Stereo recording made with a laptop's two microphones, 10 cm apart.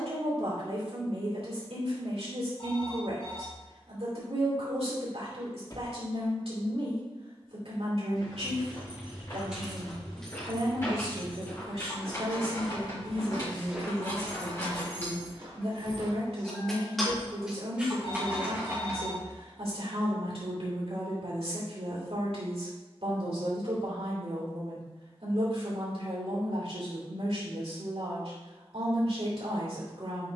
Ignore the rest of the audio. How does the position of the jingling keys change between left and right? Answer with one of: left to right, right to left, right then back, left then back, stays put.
left then back.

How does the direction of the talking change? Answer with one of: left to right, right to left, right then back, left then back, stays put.
stays put.